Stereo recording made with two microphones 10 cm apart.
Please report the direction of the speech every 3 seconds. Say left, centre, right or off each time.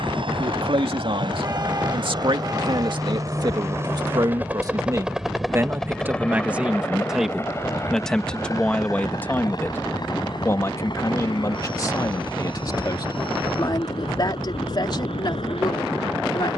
right, right, centre, left, left, left.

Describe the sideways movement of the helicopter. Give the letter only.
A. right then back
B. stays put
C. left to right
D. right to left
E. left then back
D.